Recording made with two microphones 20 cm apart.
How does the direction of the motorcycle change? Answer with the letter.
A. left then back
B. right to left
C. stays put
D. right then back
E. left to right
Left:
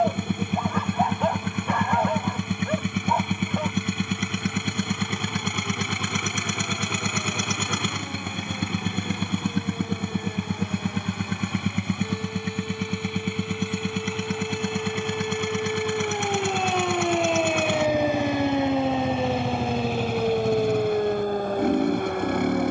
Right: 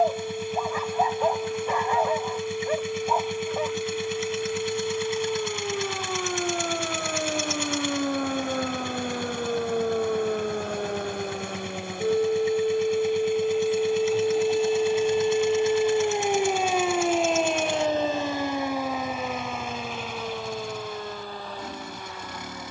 C.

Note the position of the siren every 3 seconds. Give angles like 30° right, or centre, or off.
80° right, 80° right, 70° right, 60° right, 50° right, 10° right, 30° left, 50° left.